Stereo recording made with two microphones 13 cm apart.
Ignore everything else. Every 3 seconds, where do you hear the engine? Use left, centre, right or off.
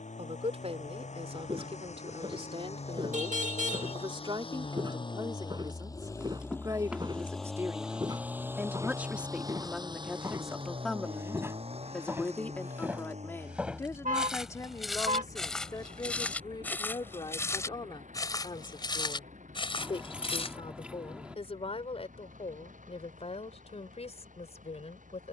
left, left, centre, right, right, right, right, right, right.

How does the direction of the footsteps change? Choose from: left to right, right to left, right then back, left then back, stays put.
right to left.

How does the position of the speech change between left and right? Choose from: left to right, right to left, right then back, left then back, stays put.
right to left.